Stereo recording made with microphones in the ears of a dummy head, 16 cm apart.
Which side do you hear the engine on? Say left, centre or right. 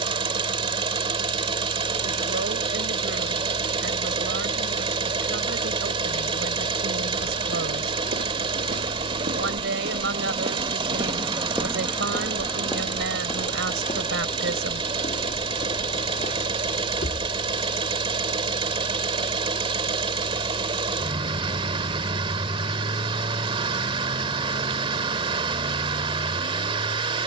right.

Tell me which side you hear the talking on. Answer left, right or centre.
right.